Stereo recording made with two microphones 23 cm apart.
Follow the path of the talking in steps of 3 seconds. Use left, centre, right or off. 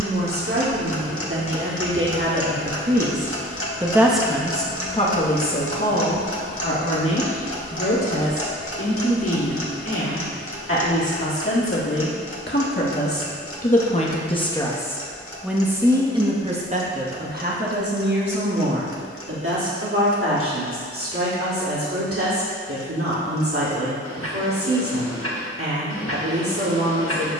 right, centre, left, left, left, right, right, right, right.